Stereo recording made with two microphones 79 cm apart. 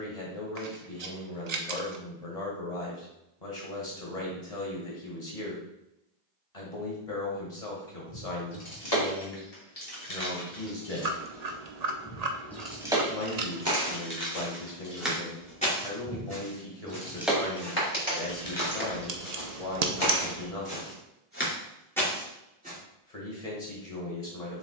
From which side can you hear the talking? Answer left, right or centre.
left.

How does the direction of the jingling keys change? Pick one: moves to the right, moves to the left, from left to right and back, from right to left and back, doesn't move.
from left to right and back.